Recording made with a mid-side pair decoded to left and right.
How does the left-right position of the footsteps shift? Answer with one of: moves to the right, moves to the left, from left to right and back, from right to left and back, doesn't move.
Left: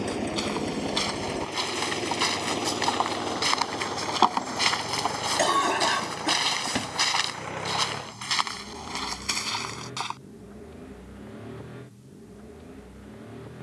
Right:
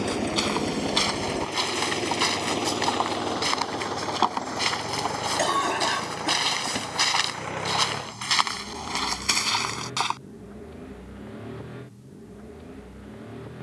from right to left and back.